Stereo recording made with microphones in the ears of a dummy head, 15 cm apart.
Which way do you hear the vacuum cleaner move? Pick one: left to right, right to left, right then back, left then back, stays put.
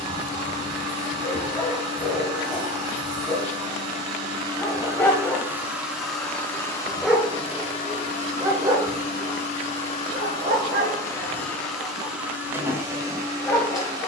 left then back.